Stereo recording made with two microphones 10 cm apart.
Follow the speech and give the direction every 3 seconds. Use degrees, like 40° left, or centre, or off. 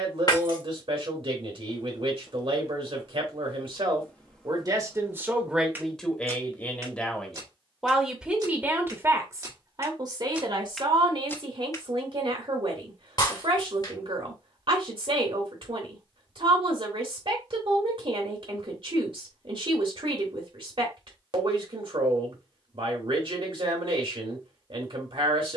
70° right, 40° right, centre, 50° right, 60° right, 60° right, 60° right, 60° right, 60° right.